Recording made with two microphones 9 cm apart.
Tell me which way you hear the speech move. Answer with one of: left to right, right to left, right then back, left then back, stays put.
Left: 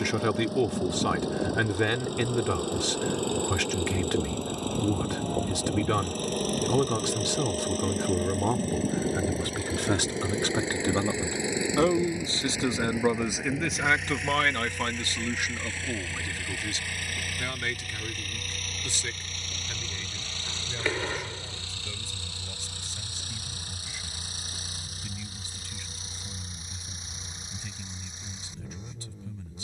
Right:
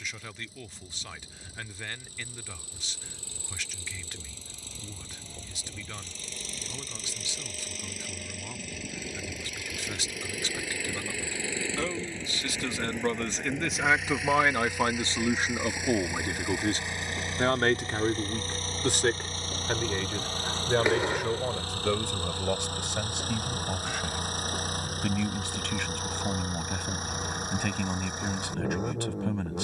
left to right.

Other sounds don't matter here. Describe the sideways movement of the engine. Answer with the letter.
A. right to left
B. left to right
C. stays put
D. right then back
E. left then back
B.